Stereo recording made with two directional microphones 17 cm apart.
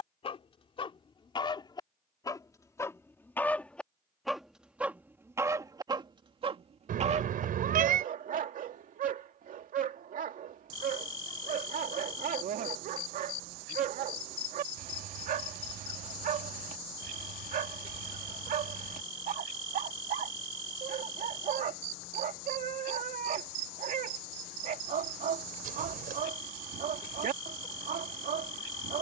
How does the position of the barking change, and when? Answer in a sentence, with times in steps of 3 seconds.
In this clip you hear the barking on the left from 0 s, in the centre from 3 s and on the right from 6 s.